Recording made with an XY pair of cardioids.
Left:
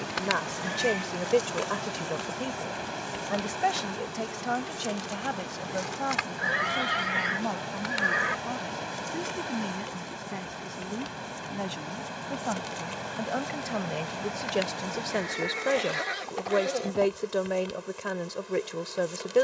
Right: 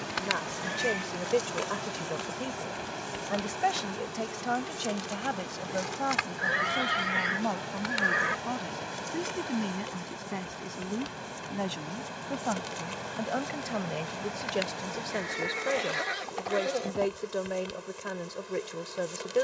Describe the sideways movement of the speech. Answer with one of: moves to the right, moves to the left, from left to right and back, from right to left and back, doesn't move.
from left to right and back.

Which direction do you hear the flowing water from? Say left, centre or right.
left.